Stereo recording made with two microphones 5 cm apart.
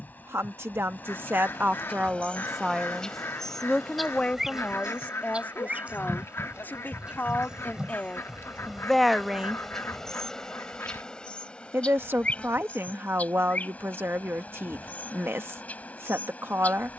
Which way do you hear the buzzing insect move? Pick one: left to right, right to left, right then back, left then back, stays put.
right then back.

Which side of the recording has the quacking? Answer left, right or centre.
left.